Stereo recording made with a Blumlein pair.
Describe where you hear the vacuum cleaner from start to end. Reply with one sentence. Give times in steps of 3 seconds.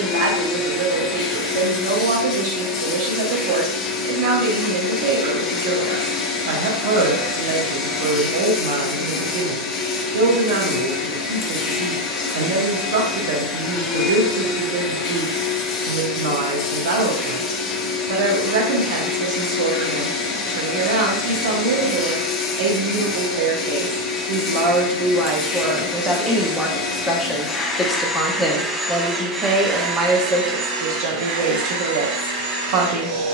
In this clip you hear the vacuum cleaner on the left from 0 s, in the centre from 27 s and on the right from 30 s.